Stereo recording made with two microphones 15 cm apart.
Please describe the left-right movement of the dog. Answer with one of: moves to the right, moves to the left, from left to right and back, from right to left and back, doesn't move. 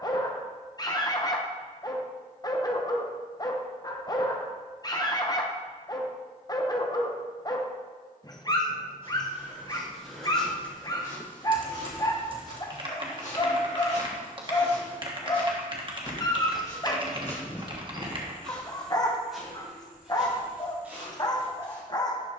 doesn't move.